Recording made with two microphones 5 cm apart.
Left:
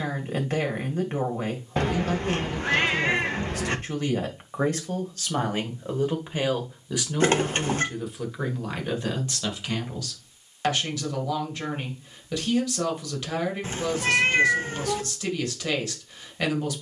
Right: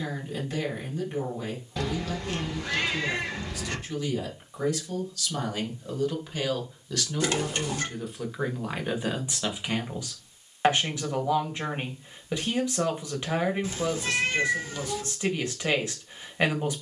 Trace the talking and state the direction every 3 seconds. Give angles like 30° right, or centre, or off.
50° left, 40° left, 10° left, 20° right, 20° right, 20° right.